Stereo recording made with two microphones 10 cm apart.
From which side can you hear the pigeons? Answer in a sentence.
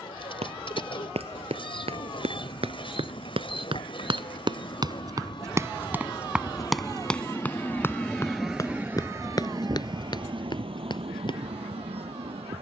You can hear the pigeons on the left.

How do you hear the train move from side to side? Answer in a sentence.
You can hear the train go from the left side to the right.